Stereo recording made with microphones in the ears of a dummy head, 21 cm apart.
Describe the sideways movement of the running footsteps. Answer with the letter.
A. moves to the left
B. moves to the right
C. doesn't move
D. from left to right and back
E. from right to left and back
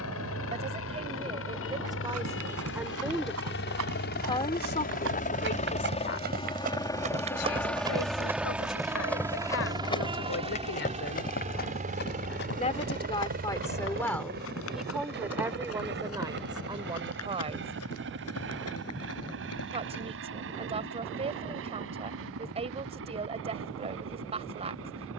A.